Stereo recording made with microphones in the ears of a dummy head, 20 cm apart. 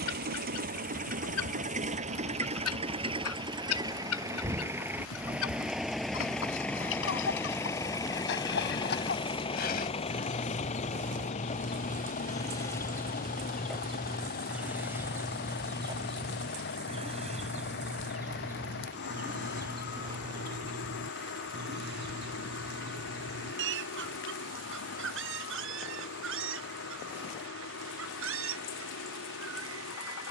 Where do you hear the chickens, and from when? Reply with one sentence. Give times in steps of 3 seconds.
You can hear the chickens on the left from 0 s, in the centre from 12 s and on the right from 15 s.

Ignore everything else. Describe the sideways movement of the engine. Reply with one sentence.
You can hear the engine move from right to left.